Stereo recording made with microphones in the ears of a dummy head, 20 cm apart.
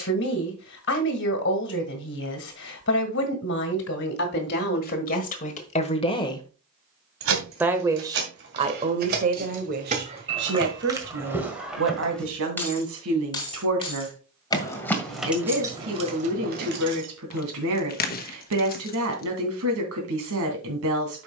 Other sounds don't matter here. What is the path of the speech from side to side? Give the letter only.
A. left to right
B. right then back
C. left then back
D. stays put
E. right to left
A.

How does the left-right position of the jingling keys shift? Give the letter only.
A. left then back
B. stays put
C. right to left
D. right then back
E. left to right
A.